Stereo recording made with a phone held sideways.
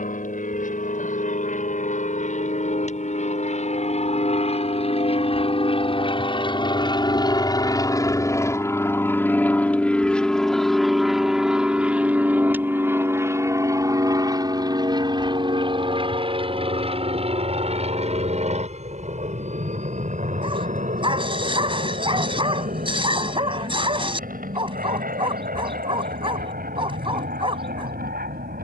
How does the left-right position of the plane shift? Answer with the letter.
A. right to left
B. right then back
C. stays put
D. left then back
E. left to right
E.